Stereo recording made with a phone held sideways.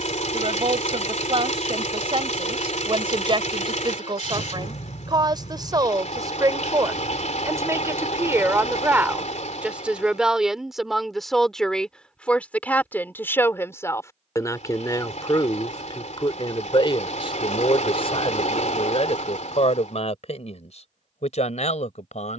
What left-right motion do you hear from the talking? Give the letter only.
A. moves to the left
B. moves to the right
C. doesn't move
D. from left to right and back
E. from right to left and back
A.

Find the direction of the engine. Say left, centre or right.
left.